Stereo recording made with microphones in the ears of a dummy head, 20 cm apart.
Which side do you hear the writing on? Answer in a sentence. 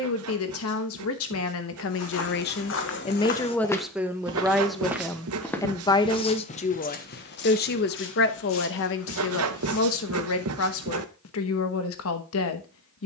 You can hear the writing on the right.